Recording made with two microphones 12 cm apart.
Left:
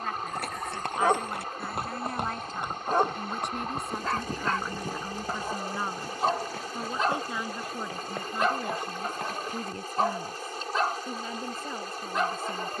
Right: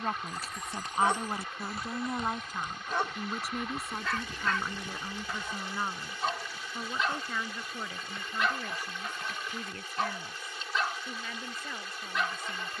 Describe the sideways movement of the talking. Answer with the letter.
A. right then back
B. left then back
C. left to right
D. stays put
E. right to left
E.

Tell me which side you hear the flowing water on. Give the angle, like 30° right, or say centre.
40° left.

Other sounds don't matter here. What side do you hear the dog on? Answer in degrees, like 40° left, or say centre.
40° left.